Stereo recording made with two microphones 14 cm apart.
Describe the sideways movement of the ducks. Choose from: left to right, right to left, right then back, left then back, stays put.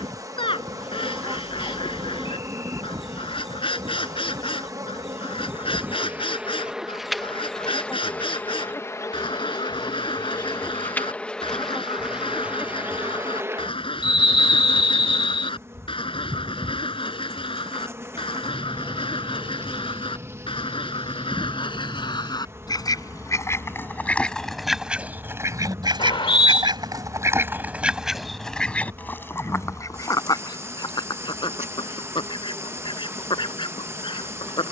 right then back.